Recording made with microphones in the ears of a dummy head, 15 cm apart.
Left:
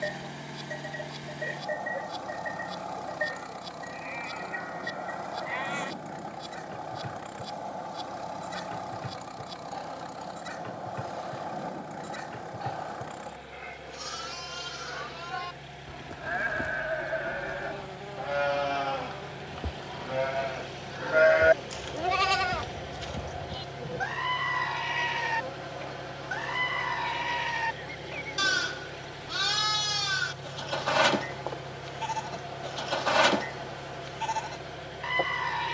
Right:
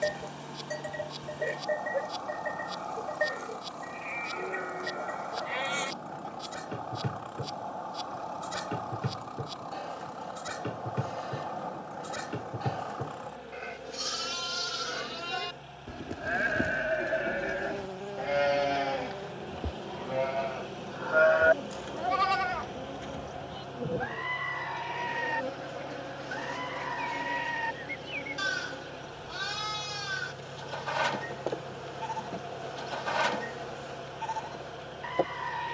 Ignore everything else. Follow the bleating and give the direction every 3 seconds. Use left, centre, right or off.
right, right, right, right, right, right, centre, left, left, left, left, left.